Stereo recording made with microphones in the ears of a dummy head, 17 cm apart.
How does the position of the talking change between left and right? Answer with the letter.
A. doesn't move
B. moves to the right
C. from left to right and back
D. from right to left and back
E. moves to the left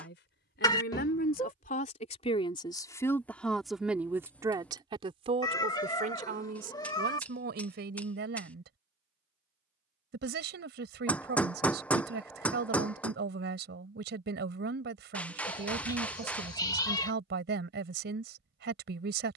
B.